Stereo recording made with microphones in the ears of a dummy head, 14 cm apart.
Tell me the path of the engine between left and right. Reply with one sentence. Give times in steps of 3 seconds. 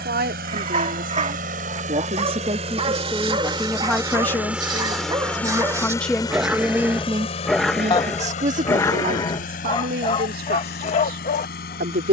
In this clip you hear the engine on the right from 0 s, in the centre from 3 s and on the left from 6 s.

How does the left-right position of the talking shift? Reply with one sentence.
You can hear the talking go left and come back.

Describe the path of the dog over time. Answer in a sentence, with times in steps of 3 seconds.
In this clip you hear the dog on the right from 0 s, in the centre from 6 s and on the left from 9 s.